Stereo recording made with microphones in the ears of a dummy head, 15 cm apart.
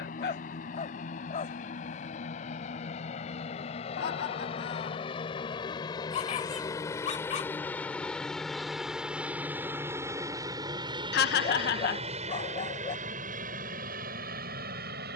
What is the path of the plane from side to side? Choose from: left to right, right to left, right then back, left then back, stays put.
left to right.